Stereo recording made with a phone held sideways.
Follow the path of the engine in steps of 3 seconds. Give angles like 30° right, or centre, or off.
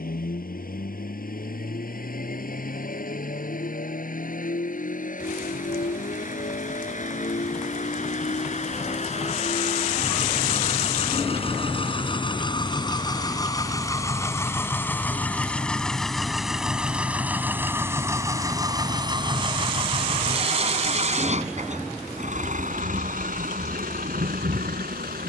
60° left, 50° left, 50° left, 40° left, 20° left, centre, 30° right, 50° right, 60° right.